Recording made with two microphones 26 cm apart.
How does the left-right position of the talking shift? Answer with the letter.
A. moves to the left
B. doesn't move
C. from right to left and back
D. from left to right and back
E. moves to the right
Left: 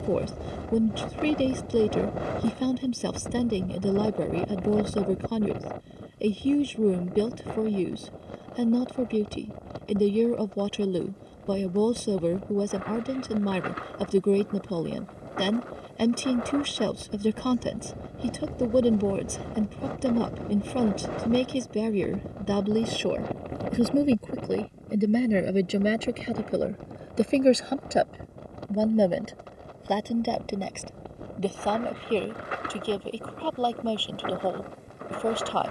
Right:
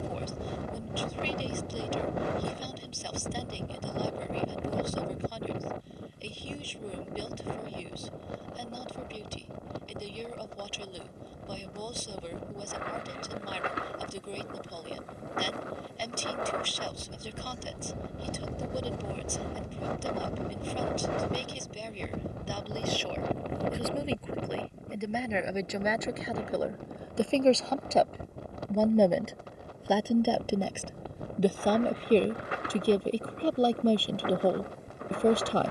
E.